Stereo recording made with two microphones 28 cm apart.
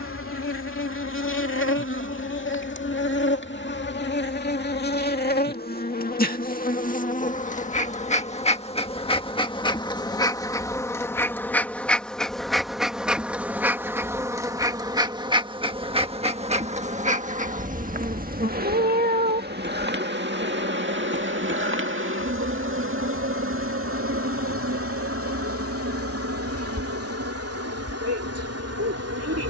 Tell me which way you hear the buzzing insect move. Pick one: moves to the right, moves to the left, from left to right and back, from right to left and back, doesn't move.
moves to the right.